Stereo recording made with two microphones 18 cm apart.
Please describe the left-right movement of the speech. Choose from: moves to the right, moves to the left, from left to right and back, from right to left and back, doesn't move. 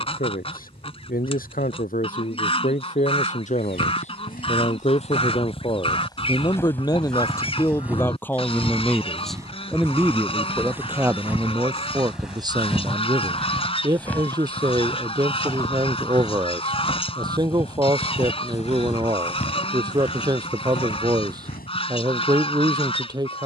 moves to the right.